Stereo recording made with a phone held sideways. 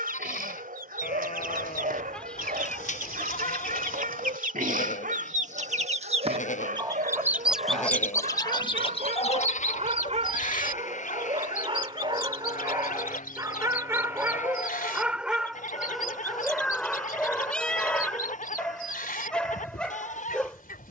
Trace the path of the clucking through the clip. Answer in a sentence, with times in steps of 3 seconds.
In this clip you hear the clucking on the right from 0 s, in the centre from 6 s and on the left from 9 s.